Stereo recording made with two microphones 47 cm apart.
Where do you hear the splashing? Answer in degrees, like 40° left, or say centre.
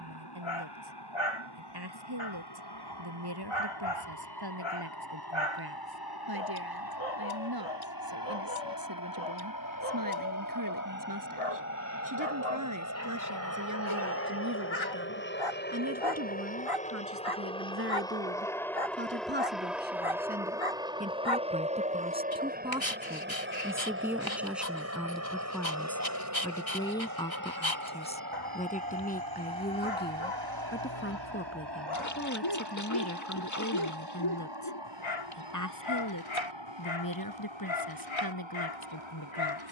40° left.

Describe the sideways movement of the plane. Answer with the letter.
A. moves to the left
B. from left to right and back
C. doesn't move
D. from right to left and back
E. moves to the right
E.